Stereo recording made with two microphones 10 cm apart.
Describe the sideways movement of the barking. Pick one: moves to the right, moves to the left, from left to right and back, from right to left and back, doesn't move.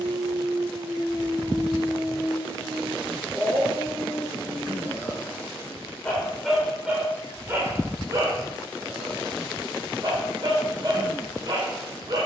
from right to left and back.